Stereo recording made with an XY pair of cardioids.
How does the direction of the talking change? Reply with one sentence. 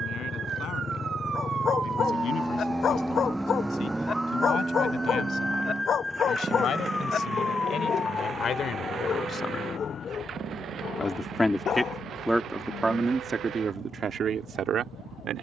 You can hear the talking travel towards the right.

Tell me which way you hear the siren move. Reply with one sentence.
In this clip you hear the siren move from right to left.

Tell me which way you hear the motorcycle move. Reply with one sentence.
In this clip you hear the motorcycle move to the right.